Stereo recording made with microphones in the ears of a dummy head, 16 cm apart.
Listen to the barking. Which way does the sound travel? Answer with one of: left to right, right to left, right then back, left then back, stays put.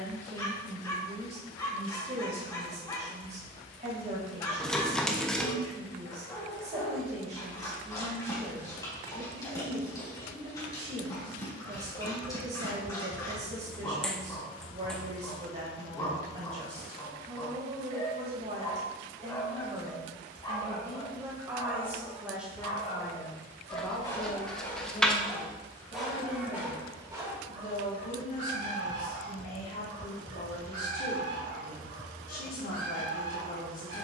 left to right.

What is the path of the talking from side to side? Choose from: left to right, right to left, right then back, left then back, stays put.
right to left.